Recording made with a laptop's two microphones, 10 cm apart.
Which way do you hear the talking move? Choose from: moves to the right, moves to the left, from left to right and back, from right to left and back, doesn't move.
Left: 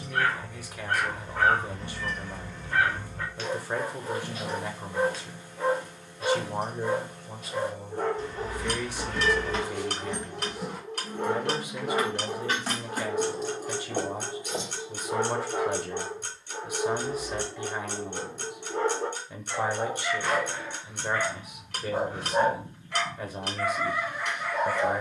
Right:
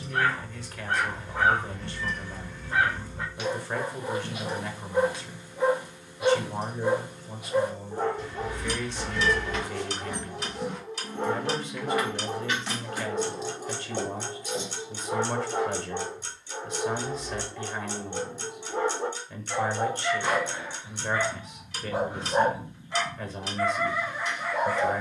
doesn't move.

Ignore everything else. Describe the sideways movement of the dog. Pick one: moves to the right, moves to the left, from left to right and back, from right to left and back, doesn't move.
doesn't move.